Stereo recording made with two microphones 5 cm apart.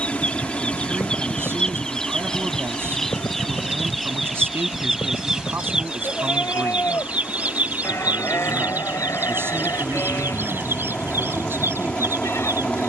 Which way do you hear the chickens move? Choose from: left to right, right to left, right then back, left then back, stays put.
left to right.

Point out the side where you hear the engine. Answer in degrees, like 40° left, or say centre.
30° left.